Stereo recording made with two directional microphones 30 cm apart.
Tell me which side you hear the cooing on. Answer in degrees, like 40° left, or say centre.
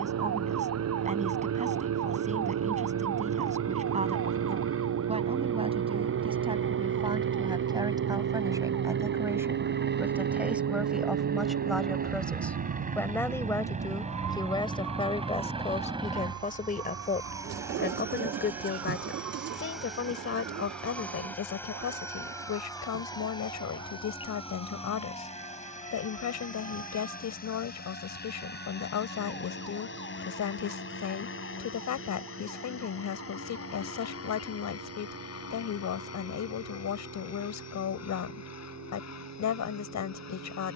50° right.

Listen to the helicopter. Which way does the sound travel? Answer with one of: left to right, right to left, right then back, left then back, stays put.
right to left.